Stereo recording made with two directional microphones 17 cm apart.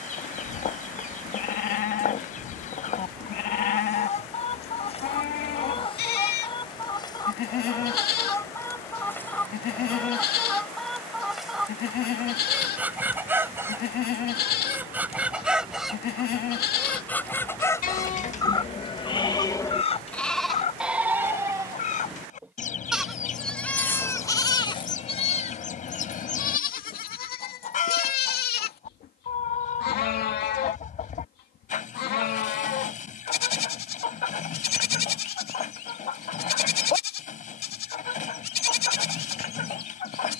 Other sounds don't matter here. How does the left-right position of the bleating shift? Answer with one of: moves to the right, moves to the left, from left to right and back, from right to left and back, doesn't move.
from left to right and back.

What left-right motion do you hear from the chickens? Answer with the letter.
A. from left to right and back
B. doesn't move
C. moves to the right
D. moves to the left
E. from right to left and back
A.